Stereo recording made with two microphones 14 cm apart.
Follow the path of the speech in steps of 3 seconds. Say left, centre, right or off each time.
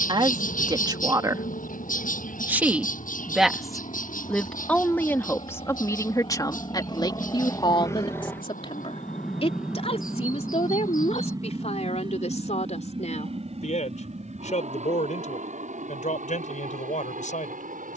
right, centre, left, left, left, left.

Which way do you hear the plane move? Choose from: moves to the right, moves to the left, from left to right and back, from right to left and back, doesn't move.
moves to the right.